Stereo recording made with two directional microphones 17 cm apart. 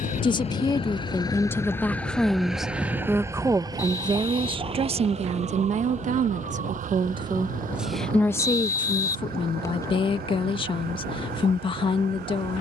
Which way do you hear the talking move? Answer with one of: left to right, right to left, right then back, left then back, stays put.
right then back.